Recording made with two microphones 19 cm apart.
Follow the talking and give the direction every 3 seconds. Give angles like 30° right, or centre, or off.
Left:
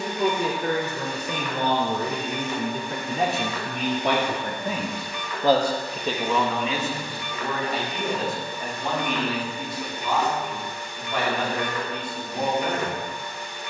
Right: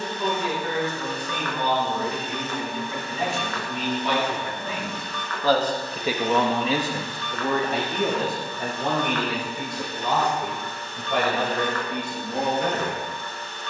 60° left, 50° left, 50° right, 80° right, 80° right.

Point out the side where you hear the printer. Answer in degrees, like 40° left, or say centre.
10° left.